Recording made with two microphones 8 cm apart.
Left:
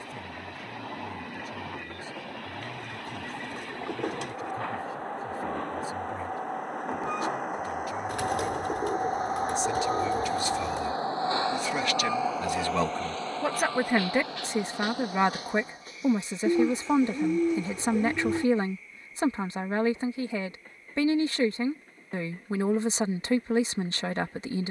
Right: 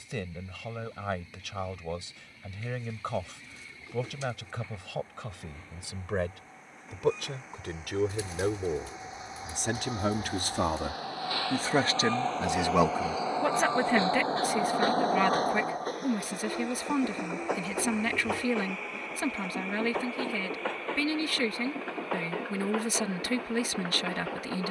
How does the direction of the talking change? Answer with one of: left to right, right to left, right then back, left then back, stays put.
right to left.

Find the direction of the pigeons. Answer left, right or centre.
left.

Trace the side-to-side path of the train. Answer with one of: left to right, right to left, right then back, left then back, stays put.
left to right.